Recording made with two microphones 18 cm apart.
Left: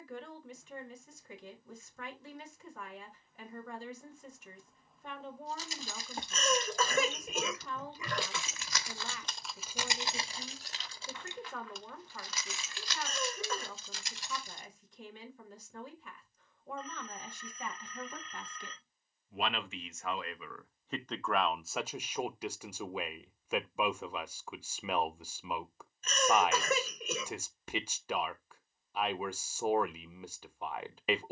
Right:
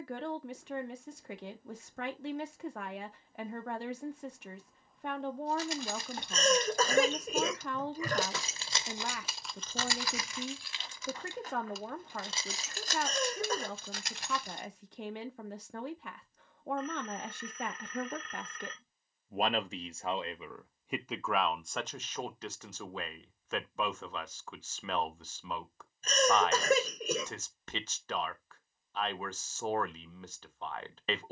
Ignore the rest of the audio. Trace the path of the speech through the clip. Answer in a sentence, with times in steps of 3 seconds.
You can hear the speech on the right from 0 s and in the centre from 21 s.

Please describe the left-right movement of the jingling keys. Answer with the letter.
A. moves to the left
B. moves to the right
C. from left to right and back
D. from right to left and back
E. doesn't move
D.